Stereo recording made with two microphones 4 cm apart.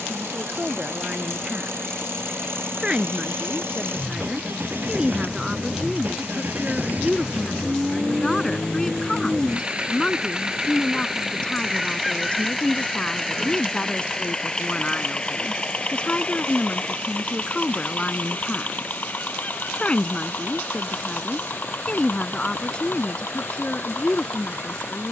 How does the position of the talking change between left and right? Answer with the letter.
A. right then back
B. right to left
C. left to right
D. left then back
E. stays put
B.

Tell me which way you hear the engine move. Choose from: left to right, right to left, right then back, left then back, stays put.
right to left.